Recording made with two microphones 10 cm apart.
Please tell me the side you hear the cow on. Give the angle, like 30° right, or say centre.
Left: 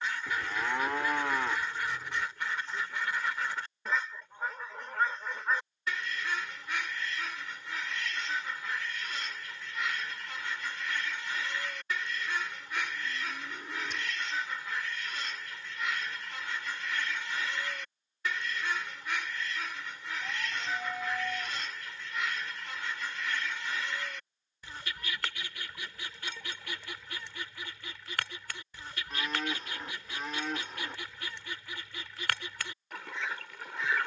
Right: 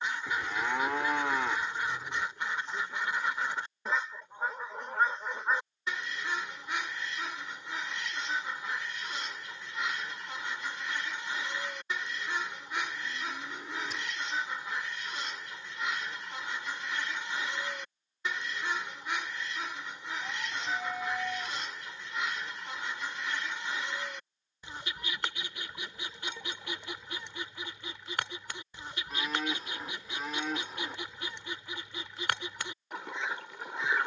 centre.